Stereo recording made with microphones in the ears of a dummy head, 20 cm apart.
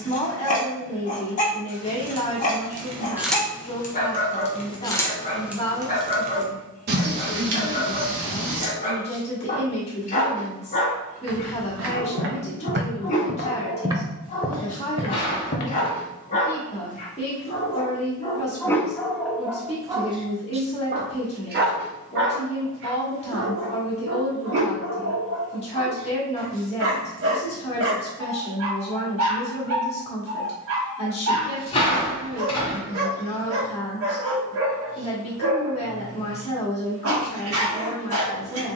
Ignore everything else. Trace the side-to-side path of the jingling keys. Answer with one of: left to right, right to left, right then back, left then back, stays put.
left then back.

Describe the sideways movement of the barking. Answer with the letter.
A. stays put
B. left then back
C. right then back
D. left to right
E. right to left
D.